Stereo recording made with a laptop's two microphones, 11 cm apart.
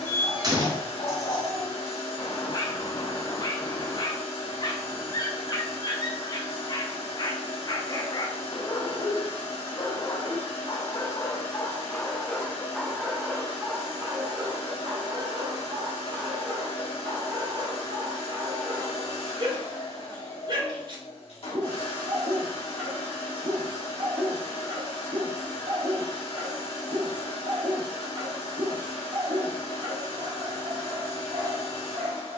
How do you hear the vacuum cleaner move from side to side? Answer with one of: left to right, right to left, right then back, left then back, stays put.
stays put.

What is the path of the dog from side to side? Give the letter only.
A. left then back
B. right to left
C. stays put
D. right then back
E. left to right
E.